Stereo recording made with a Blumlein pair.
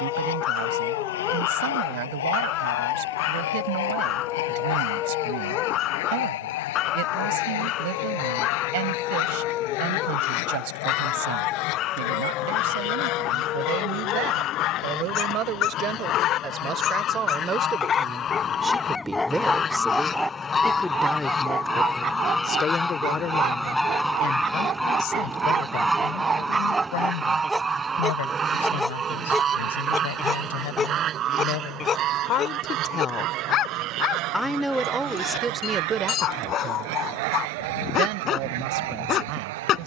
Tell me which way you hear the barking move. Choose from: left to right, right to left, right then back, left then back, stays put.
right then back.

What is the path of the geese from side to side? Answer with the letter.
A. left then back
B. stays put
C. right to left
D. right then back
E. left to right
E.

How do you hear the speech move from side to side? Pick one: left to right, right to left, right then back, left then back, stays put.
left then back.